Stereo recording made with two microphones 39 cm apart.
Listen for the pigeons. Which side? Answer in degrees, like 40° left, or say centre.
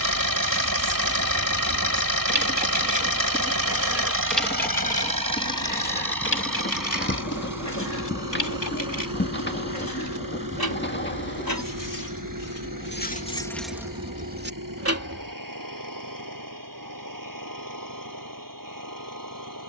30° left.